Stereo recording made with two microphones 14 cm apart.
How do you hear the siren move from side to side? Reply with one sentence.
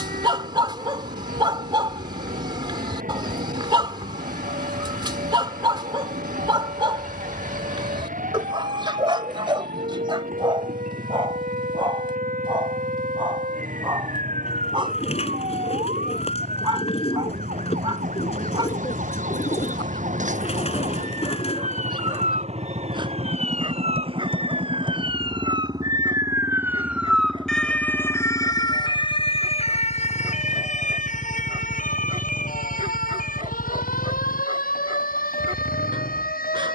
In this clip you hear the siren move from right to left.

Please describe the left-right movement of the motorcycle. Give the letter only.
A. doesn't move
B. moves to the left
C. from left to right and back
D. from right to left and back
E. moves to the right
B.